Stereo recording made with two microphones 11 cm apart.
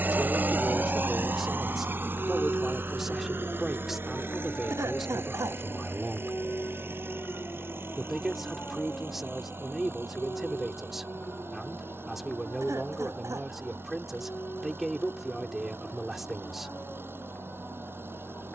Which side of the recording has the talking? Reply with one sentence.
You can hear the talking in the centre.